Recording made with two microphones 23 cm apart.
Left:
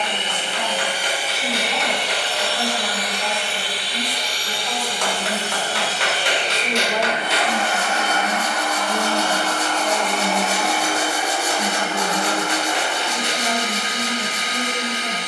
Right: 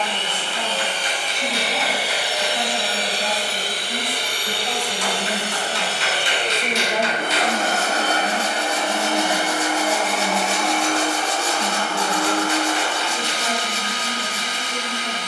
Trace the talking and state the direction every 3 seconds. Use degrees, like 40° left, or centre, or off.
60° right, 40° right, centre, 30° left, 40° left.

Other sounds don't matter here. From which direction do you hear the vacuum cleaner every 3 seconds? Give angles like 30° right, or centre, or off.
centre, 50° right, 40° right, centre, 20° left.